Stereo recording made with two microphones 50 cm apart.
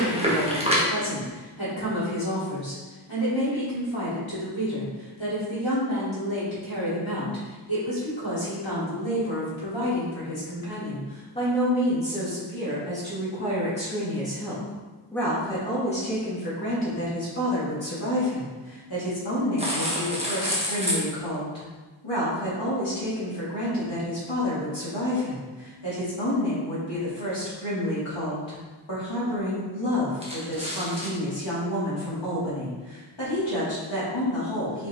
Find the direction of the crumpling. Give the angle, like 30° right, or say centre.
10° right.